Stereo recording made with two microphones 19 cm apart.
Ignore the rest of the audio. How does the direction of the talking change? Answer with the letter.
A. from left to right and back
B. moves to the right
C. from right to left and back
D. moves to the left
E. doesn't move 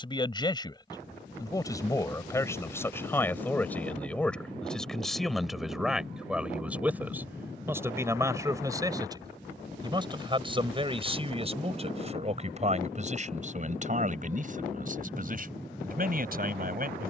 B.